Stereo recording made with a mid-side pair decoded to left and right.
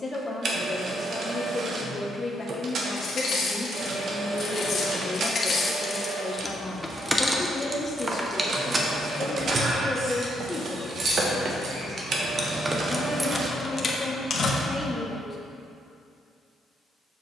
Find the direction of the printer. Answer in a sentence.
You can hear the printer on the right.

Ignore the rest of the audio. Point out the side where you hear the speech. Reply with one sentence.
In this clip you hear the speech on the left.